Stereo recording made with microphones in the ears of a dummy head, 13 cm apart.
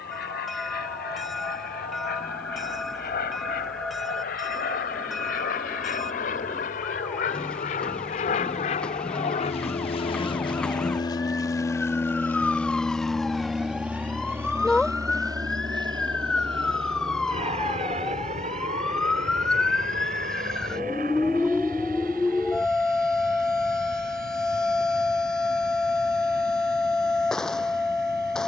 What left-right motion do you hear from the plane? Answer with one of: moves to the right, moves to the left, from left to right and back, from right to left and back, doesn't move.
moves to the right.